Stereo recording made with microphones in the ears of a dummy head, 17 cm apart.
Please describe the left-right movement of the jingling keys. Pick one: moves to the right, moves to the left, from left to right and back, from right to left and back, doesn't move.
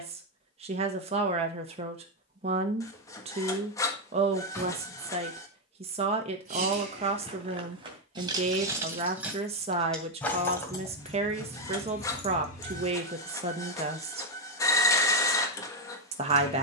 moves to the left.